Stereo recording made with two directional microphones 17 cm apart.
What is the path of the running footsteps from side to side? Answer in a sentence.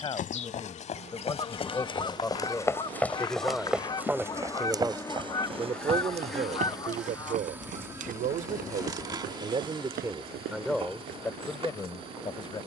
You can hear the running footsteps go from the left side to the right.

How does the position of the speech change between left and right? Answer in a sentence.
In this clip you hear the speech move from left to right and back again.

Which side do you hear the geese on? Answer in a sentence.
In this clip you hear the geese on the left.